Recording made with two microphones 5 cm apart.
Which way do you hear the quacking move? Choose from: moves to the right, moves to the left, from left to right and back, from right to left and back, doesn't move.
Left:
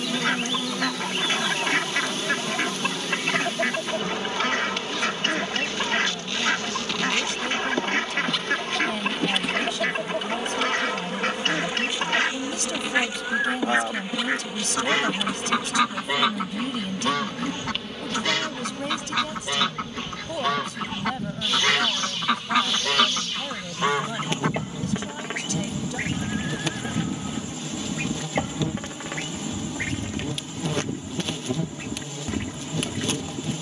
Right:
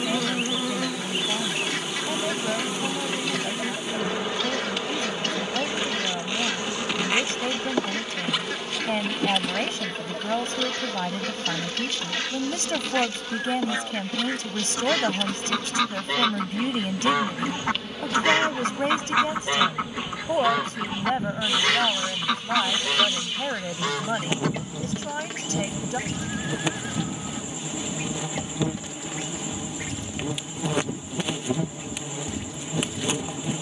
from left to right and back.